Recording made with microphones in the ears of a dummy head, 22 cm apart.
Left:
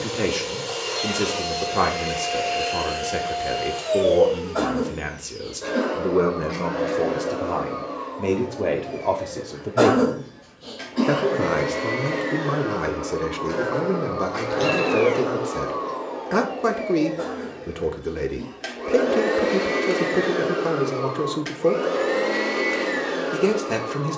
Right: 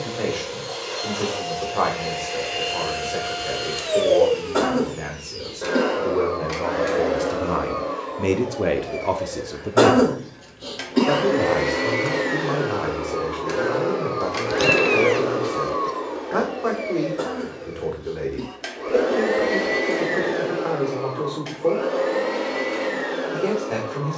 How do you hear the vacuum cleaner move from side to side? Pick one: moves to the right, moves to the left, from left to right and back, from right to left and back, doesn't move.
from left to right and back.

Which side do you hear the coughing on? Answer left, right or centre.
right.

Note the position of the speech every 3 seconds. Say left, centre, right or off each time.
left, left, centre, centre, left, left, left, left.